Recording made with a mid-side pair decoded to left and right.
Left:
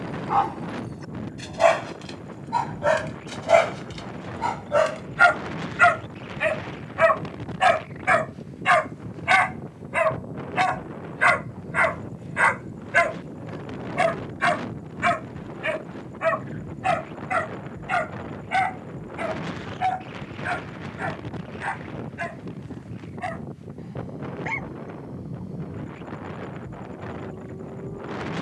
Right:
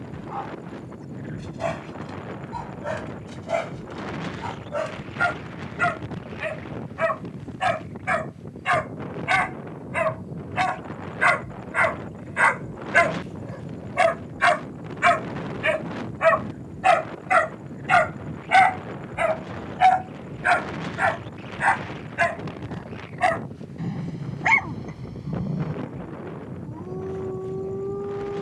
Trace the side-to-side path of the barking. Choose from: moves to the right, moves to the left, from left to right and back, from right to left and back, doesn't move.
moves to the right.